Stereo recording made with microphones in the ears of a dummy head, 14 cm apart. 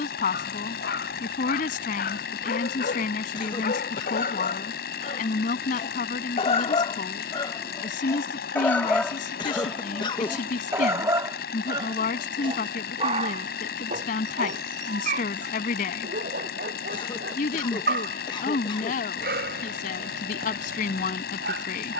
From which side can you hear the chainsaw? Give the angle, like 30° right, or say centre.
70° left.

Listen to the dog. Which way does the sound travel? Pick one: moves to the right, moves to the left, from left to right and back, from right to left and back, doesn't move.
moves to the right.